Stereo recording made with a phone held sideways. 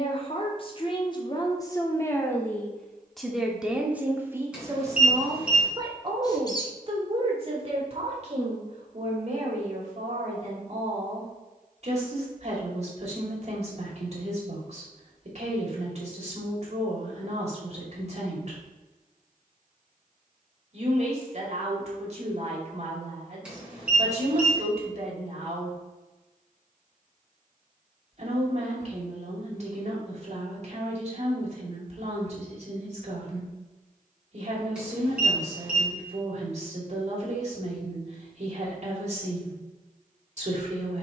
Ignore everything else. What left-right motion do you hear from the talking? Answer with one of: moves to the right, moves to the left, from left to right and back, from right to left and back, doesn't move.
moves to the right.